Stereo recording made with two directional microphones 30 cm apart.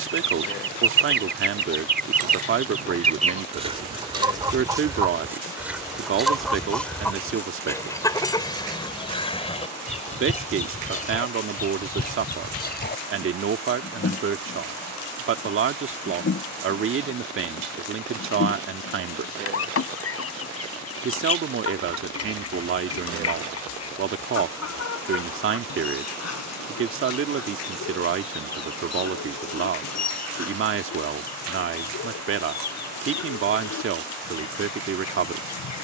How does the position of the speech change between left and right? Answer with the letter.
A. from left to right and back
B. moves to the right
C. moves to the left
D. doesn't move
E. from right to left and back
D.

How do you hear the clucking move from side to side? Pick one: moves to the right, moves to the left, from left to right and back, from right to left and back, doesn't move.
moves to the left.